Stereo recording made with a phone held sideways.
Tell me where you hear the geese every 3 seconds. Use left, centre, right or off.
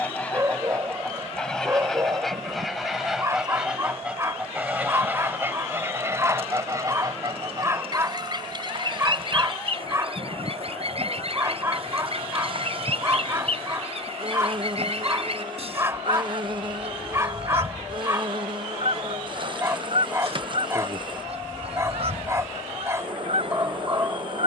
centre, centre, right, right, right, right, right, right.